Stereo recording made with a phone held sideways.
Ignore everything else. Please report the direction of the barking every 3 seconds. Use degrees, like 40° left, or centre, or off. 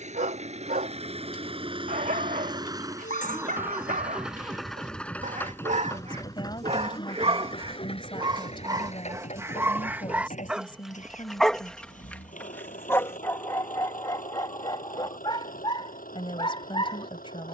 60° right, 60° right, 40° right, 10° right, 20° left, 30° left.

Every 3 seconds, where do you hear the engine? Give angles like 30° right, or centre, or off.
40° right, centre, 40° left, 50° left, 60° left, 70° left.